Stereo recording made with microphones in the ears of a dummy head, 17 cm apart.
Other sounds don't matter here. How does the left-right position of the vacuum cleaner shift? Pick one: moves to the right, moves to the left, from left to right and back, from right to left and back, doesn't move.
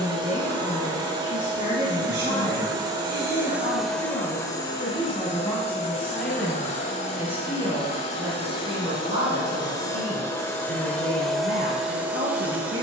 from right to left and back.